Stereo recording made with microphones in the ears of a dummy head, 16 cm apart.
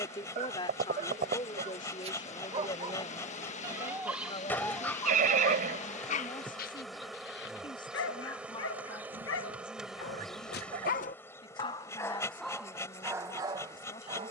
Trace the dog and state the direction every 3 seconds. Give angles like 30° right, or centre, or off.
30° right, centre, 60° left, 50° left, 10° right.